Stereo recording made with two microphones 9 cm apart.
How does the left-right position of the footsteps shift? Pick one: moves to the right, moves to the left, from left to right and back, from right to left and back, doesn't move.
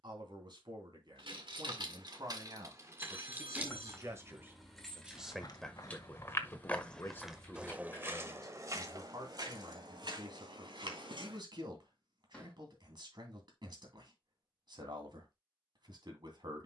moves to the right.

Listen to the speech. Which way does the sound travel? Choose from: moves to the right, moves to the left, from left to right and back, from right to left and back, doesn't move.
from right to left and back.